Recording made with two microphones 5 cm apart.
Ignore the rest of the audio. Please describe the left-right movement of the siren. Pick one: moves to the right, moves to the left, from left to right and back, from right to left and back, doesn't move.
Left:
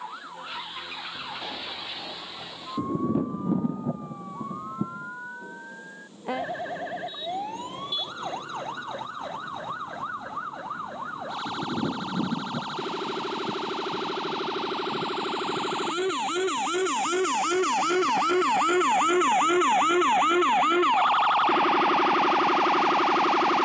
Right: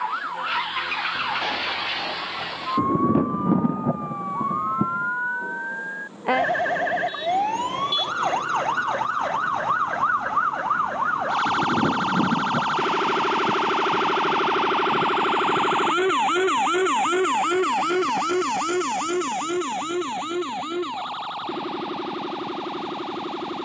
moves to the left.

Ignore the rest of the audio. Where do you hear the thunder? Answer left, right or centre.
right.